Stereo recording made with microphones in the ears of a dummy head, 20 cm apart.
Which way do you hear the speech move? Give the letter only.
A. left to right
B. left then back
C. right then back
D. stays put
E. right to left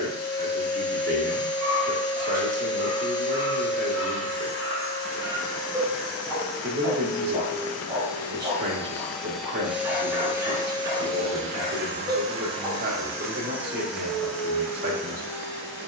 D.